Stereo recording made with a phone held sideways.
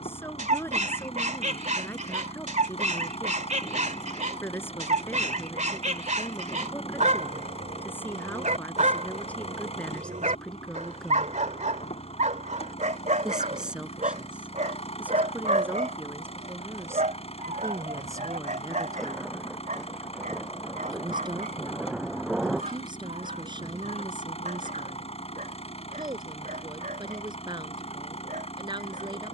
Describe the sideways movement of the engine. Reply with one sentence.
In this clip you hear the engine stay put.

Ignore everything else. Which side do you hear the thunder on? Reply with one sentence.
In this clip you hear the thunder in the centre.